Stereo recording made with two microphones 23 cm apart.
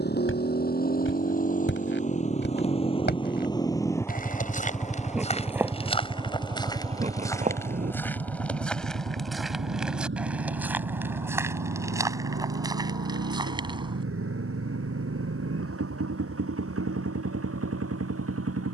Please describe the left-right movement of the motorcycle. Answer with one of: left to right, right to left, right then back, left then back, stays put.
left to right.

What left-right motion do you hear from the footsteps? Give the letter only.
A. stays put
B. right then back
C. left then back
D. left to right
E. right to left
D.